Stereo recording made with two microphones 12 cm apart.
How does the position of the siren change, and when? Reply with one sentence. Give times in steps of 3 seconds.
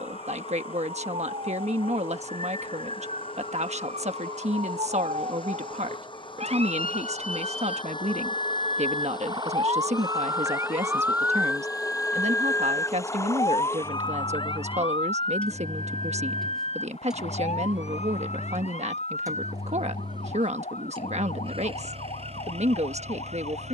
You can hear the siren on the right from 0 s and on the left from 12 s.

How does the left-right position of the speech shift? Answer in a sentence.
In this clip you hear the speech stay put.